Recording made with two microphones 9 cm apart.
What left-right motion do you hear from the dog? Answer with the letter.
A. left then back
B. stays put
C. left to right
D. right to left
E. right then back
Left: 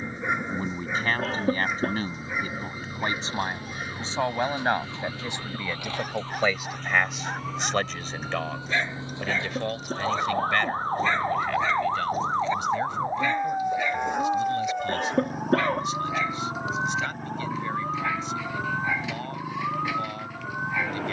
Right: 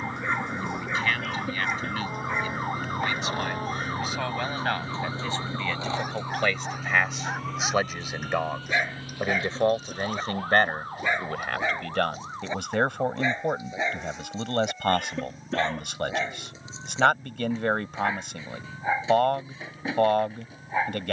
C.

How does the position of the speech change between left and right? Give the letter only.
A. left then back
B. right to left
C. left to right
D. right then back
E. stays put
C.